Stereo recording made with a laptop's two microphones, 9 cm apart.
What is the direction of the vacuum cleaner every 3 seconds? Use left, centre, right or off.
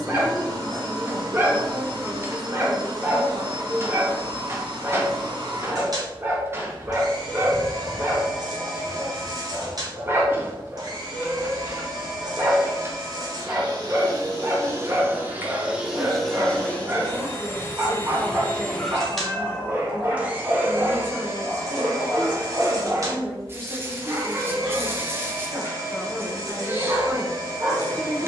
right, right, right, right, right, centre, centre, right, right, right.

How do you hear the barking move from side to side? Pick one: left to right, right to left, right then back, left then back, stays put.
stays put.